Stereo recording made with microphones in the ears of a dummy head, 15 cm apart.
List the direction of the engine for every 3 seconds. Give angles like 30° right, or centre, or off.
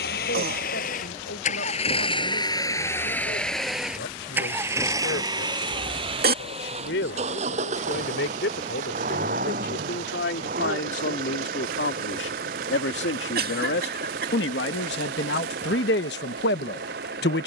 40° left, 10° right, 40° right, 50° right, 60° right, 60° right.